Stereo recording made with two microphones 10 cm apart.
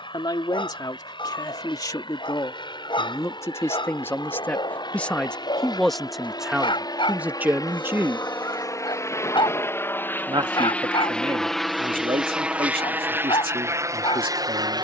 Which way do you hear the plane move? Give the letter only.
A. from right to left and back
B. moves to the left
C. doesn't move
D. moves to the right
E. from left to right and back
D.